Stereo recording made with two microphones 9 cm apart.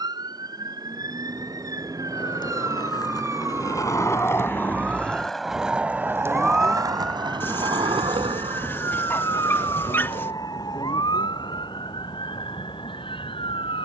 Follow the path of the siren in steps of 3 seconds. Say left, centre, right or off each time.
right, right, centre, left, left.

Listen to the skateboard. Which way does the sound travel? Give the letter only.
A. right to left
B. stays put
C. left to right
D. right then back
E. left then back
C.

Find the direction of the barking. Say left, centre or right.
left.